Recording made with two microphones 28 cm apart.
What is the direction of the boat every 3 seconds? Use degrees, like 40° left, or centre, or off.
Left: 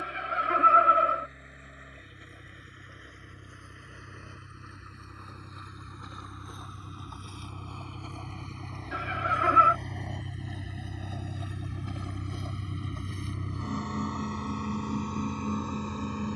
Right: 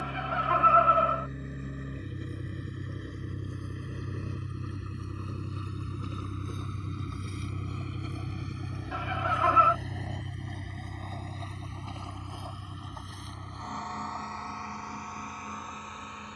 50° right, 40° right, 20° right, centre, 30° left, 50° left.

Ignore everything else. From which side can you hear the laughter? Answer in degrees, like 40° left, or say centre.
20° left.